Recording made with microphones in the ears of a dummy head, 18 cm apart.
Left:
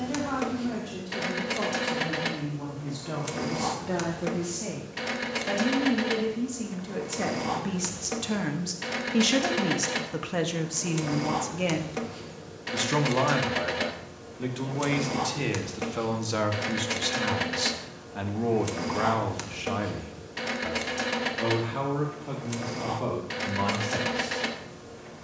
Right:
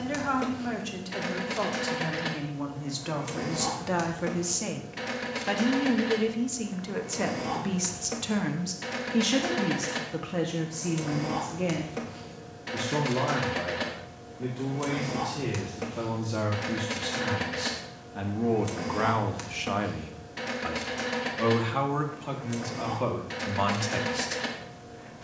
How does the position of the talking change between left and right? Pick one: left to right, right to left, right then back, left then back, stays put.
left then back.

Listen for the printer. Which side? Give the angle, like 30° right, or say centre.
20° left.